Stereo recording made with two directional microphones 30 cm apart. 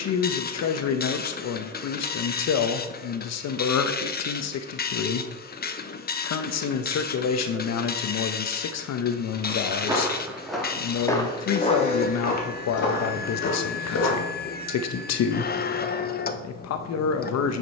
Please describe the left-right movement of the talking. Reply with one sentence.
You can hear the talking stay in one place.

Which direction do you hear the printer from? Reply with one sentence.
In this clip you hear the printer on the left.